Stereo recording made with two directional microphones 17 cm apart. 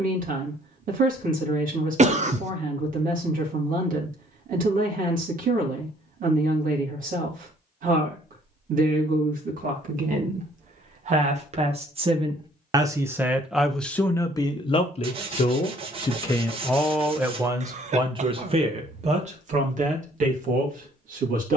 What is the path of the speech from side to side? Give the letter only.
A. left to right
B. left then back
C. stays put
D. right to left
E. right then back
B.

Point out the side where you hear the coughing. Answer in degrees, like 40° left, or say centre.
40° right.